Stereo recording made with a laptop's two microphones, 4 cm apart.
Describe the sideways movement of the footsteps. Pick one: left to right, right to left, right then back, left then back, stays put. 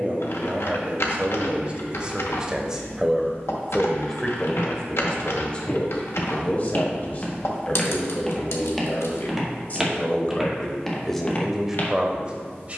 right then back.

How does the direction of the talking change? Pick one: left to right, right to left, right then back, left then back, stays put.
left then back.